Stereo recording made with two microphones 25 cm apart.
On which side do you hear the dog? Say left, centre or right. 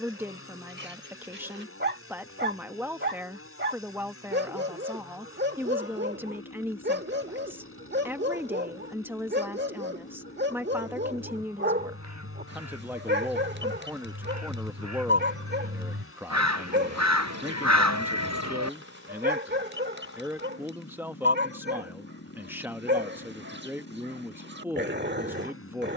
right.